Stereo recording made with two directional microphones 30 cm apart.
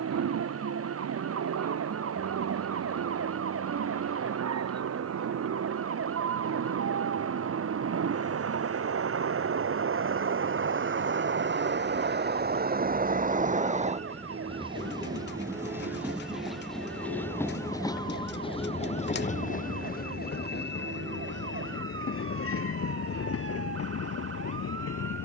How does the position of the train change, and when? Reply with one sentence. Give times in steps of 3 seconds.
You can hear the train on the right from 0 s, in the centre from 15 s and on the left from 18 s.